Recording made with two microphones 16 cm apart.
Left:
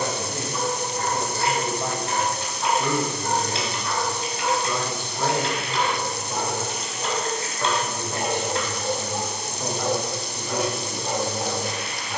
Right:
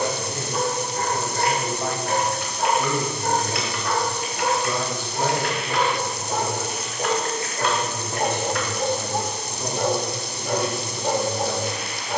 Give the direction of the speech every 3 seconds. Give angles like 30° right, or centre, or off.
10° left, 20° right, centre, 20° left.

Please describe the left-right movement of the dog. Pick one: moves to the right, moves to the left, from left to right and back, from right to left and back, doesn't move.
doesn't move.